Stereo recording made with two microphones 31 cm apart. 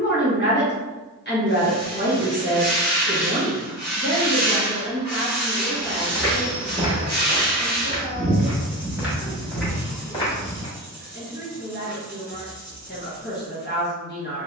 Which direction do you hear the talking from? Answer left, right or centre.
left.